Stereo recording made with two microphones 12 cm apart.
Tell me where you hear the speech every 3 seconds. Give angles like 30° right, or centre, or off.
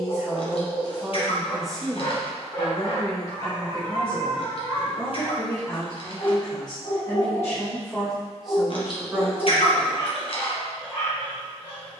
centre, 40° left, 20° left, 10° right.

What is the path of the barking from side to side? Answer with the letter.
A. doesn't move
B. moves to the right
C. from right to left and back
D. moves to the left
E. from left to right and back
A.